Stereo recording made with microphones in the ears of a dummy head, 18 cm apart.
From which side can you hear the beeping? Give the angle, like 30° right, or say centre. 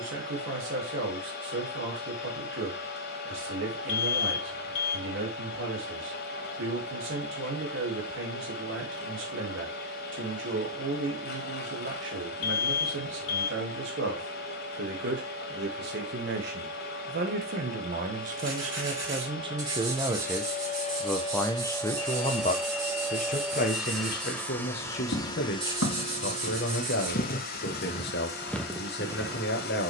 80° left.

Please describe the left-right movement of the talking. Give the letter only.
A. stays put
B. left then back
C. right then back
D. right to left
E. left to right
D.